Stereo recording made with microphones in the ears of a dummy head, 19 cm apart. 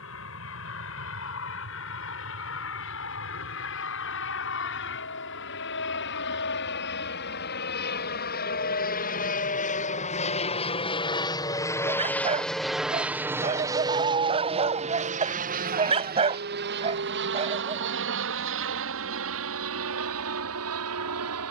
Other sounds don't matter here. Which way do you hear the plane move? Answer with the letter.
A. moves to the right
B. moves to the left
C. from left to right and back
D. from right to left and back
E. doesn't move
A.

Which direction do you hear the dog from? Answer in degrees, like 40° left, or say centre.
30° right.